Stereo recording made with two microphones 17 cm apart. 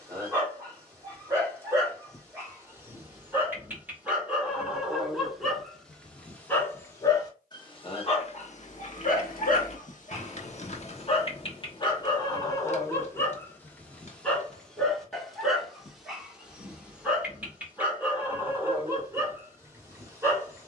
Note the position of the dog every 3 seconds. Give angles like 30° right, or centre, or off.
20° right, 10° right, 30° left, 40° left, 10° left, 10° right, 10° right.